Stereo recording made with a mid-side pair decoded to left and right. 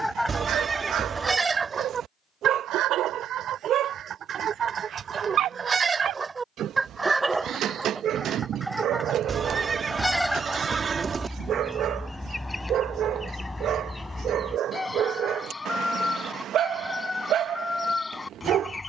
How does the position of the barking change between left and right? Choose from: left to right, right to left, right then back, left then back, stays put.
stays put.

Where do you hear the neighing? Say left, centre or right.
right.